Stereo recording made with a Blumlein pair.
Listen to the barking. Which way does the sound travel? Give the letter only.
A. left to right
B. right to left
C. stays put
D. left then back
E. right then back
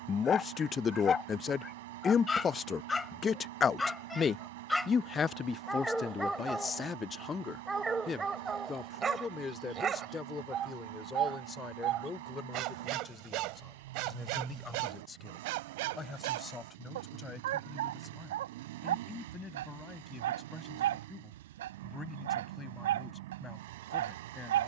A.